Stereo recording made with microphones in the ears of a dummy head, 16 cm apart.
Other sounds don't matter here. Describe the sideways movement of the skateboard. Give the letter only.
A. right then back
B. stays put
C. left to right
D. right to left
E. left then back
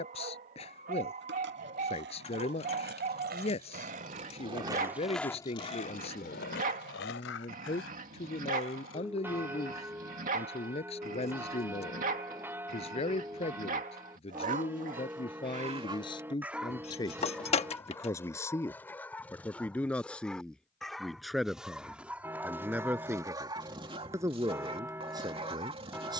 D.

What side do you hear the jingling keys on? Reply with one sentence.
In this clip you hear the jingling keys on the left.